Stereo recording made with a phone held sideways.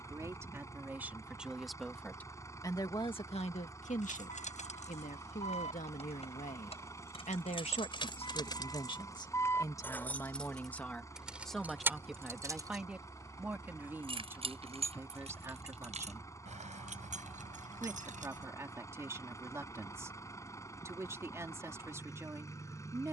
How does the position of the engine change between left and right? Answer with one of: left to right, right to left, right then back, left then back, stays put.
stays put.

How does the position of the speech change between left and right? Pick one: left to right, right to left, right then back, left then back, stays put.
left then back.